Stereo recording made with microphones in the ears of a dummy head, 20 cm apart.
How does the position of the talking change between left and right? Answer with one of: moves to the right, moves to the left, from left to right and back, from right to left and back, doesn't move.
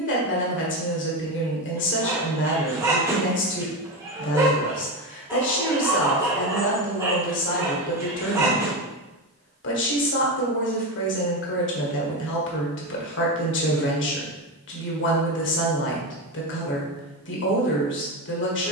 doesn't move.